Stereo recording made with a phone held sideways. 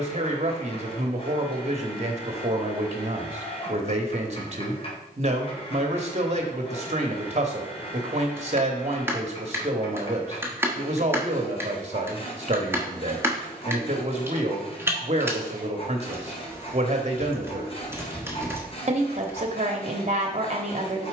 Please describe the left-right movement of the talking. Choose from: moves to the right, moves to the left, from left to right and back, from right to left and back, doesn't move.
doesn't move.